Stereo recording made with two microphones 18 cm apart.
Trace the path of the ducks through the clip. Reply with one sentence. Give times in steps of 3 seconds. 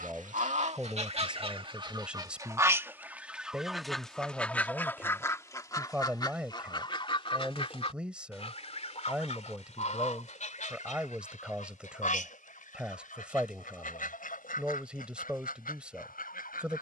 In this clip you hear the ducks on the right from 0 s, in the centre from 3 s and on the left from 6 s.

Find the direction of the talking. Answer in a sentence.
In this clip you hear the talking in the centre.